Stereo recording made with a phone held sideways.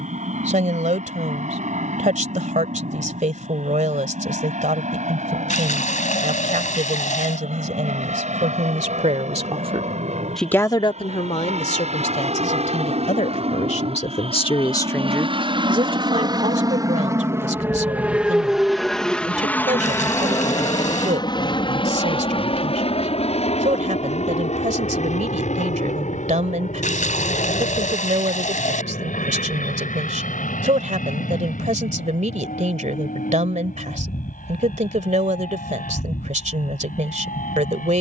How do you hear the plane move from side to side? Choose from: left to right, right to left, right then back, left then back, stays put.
right to left.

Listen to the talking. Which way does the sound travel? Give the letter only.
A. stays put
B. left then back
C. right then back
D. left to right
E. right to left
B.